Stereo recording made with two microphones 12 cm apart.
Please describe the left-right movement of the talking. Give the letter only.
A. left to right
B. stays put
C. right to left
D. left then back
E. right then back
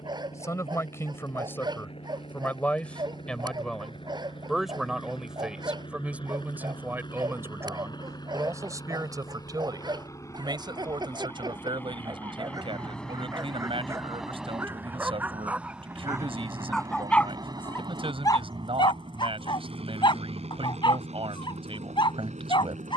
A.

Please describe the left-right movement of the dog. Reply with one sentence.
You can hear the dog move from right to left.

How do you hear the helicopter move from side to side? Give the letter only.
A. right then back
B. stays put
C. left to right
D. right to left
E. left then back
C.